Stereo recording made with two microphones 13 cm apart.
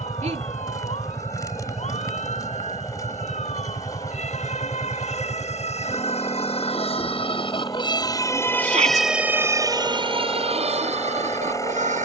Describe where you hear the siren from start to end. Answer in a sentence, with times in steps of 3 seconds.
You can hear the siren on the left from 0 s and on the right from 9 s.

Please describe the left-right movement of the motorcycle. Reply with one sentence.
In this clip you hear the motorcycle stay in one place.